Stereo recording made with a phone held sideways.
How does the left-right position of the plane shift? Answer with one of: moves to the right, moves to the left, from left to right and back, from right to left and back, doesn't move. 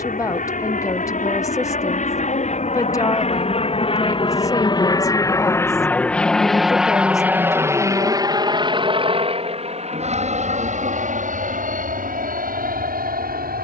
moves to the right.